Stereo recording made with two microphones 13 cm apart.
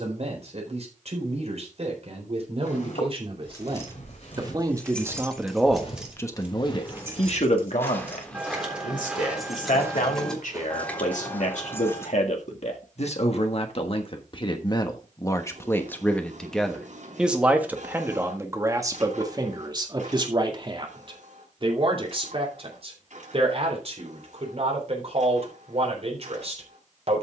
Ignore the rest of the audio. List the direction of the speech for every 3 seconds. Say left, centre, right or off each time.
right, right, left, left, left, centre, right, right, right.